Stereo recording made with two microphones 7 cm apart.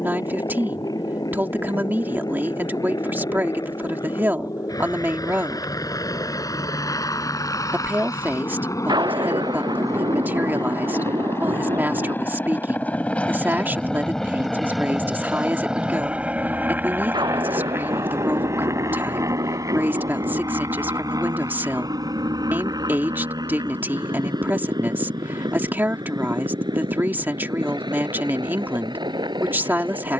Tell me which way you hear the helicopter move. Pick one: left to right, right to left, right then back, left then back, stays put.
left to right.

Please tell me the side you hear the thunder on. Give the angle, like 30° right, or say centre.
80° right.